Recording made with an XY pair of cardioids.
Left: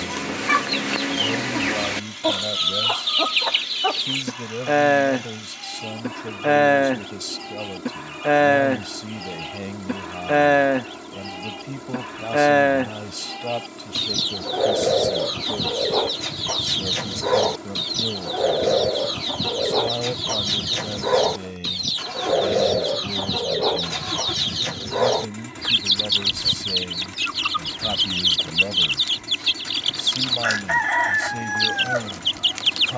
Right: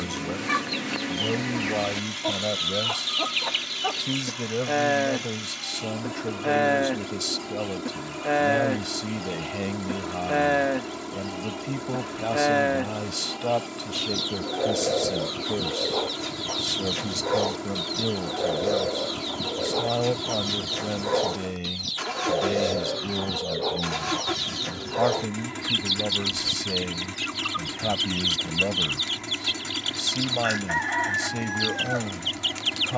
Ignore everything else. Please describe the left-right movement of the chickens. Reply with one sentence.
You can hear the chickens stay in one place.